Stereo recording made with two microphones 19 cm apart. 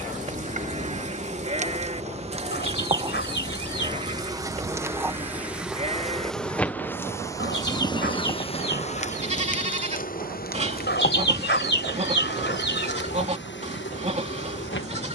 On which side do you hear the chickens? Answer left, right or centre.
left.